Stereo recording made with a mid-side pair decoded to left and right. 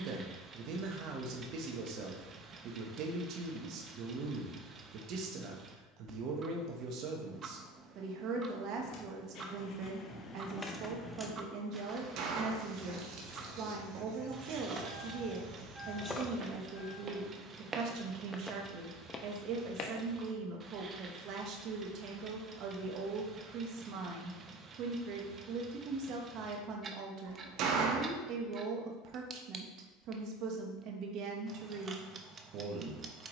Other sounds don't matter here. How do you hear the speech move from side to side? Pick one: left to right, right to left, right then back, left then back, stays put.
stays put.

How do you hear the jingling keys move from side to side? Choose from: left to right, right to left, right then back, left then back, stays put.
right then back.